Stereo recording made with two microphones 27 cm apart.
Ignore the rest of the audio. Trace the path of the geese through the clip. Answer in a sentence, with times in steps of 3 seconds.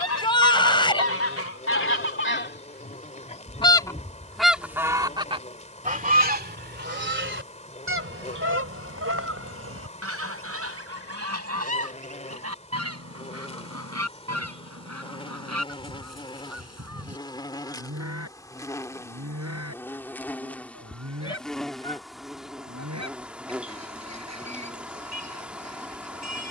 In this clip you hear the geese on the left from 0 s, in the centre from 3 s and on the right from 6 s.